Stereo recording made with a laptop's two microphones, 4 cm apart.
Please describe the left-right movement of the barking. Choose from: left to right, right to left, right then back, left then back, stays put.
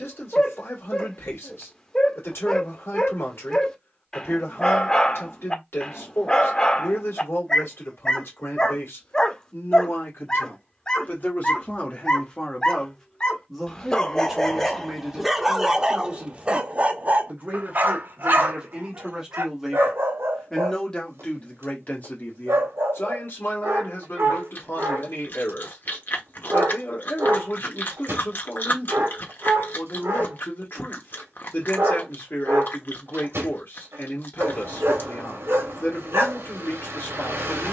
left to right.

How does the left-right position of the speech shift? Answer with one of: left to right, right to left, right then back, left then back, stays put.
right then back.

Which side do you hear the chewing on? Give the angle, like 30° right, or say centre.
50° left.